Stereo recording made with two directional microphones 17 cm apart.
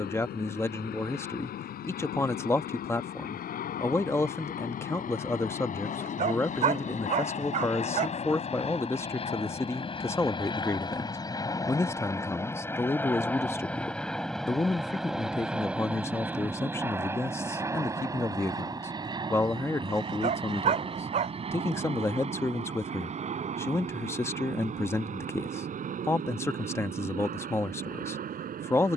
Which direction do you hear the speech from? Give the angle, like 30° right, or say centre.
10° left.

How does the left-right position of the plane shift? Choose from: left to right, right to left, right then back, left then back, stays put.
left to right.